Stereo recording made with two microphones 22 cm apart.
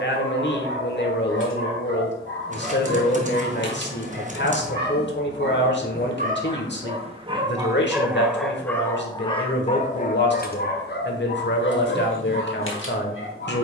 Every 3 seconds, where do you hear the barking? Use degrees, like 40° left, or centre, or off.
70° right, 50° right, 20° right, 40° left, 70° left.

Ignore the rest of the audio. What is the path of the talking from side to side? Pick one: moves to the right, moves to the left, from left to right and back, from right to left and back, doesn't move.
doesn't move.